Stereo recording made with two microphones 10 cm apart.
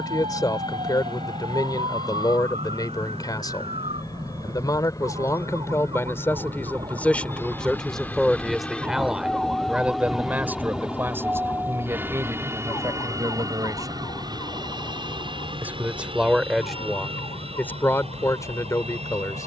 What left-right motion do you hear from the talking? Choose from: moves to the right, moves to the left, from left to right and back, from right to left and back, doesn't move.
from left to right and back.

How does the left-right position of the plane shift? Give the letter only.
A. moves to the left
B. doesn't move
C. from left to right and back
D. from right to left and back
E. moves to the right
E.